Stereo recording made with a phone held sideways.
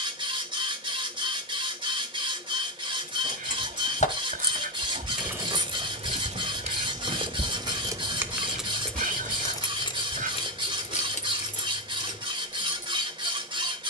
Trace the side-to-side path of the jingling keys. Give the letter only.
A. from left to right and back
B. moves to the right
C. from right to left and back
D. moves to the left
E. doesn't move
A.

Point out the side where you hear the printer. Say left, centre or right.
right.